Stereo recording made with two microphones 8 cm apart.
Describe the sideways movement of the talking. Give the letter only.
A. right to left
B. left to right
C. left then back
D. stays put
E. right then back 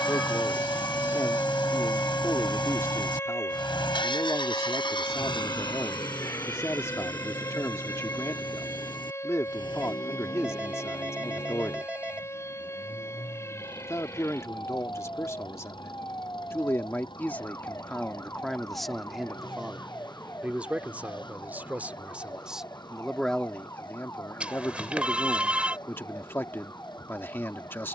E.